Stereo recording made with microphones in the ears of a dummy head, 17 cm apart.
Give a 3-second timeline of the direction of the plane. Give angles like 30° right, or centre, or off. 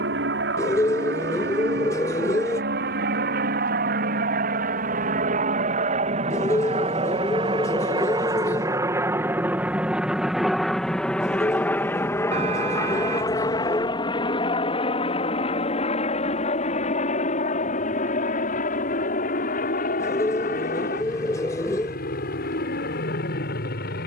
70° right, 50° right, 30° right, centre, 20° left, 40° left, 40° left, 50° left.